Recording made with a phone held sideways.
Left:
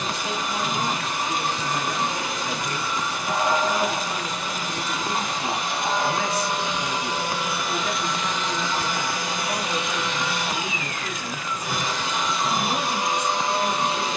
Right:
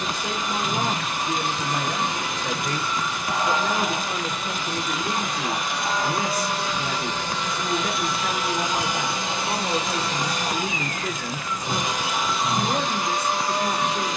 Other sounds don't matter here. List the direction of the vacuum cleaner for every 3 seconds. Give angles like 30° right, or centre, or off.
40° left, 40° left, 10° left, 30° right, 10° left.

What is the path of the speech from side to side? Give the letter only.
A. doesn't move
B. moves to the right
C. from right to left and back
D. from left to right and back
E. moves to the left
A.